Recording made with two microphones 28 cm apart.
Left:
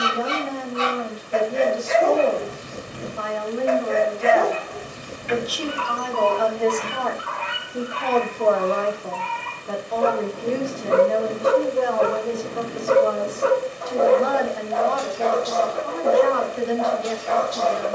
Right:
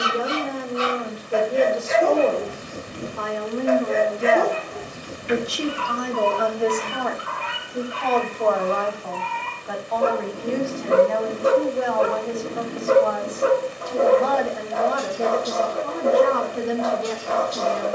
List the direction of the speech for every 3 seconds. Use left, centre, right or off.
right, right, centre, left, left, right.